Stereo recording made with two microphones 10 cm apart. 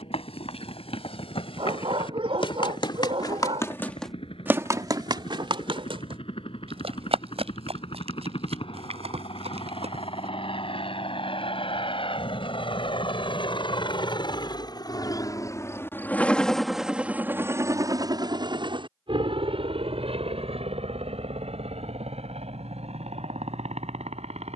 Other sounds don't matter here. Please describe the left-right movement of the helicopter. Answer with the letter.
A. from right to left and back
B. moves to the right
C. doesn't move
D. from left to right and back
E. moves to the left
B.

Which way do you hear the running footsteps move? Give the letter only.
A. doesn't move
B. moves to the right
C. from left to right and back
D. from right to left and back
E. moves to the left
B.